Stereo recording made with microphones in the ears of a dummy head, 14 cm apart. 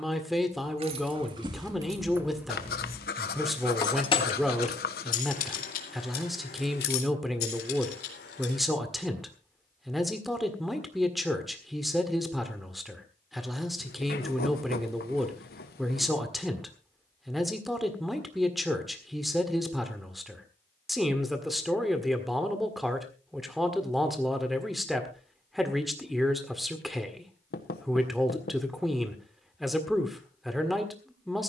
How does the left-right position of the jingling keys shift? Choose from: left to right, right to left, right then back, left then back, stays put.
right to left.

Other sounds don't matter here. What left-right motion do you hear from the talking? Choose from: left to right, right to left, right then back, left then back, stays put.
stays put.